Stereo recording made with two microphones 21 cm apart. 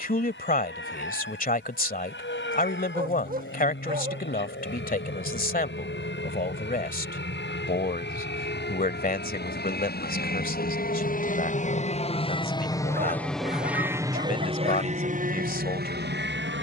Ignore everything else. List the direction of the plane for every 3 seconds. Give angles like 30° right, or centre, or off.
80° left, 70° left, 70° left, 50° left, centre, 50° right.